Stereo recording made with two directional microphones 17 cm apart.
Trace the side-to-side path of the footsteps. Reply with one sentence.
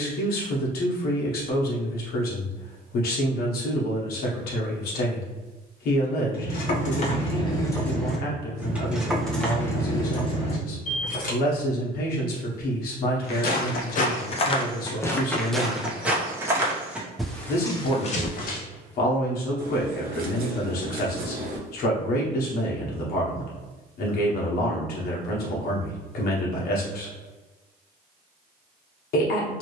You can hear the footsteps move from left to right and back again.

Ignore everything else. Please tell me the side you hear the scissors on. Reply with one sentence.
You can hear the scissors on the right.